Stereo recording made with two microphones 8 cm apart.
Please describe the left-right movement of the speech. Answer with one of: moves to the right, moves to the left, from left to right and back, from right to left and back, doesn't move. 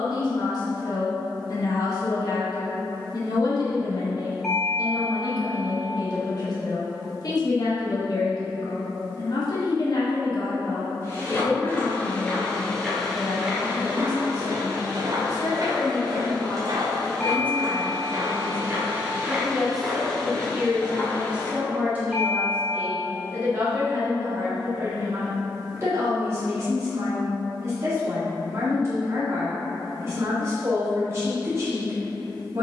moves to the right.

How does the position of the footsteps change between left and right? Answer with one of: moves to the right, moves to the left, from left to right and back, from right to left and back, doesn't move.
from left to right and back.